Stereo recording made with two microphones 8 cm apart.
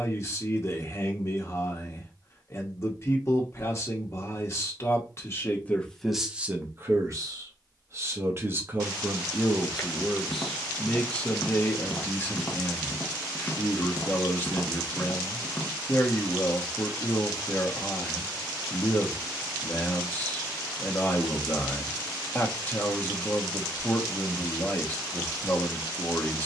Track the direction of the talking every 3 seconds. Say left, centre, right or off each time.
left, left, right, centre, left, left, left, left, left.